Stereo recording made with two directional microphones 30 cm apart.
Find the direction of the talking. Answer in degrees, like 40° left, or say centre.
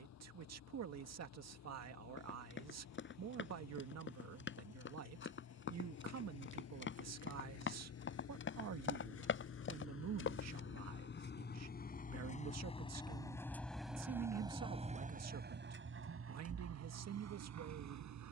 60° right.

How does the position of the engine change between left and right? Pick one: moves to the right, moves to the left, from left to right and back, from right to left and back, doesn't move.
moves to the right.